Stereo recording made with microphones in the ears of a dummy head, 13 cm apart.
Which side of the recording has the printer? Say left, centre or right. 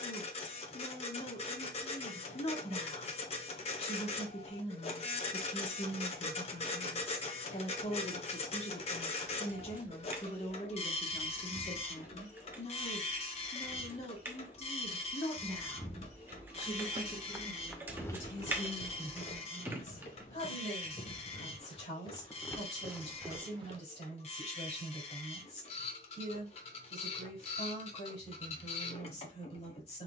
left.